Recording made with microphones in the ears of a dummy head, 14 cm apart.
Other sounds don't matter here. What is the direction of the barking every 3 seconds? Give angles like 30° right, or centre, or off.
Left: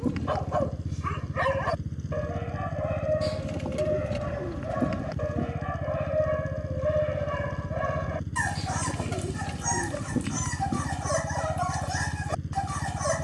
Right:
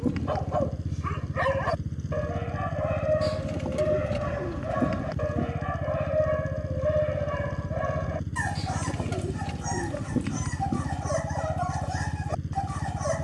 10° left, 10° right, 10° left, 30° left, 30° left.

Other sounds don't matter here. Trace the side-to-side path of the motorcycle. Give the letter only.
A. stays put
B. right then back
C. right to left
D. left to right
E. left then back
A.